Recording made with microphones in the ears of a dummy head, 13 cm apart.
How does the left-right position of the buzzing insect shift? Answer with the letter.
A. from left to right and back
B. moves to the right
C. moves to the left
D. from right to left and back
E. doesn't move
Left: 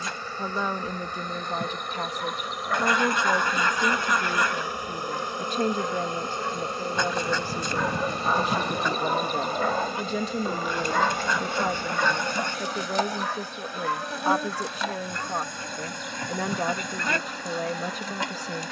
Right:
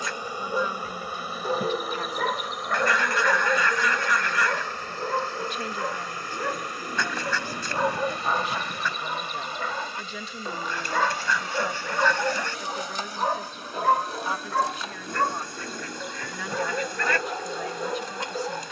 C.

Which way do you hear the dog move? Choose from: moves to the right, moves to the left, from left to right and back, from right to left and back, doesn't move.
from right to left and back.